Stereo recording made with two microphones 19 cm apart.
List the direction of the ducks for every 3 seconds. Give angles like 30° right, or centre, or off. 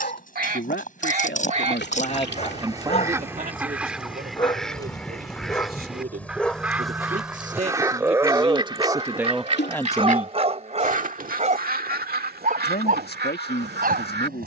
40° right, centre, 20° right, 40° right, 70° right.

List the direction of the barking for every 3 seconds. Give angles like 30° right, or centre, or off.
40° left, 20° left, 10° right, 30° right, 50° right.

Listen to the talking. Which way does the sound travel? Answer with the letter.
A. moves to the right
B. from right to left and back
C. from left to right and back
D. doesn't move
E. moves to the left
C.